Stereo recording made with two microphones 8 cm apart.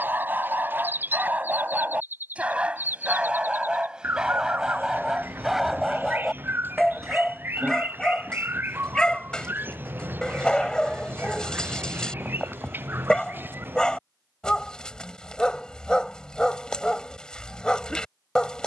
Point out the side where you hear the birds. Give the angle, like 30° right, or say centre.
20° right.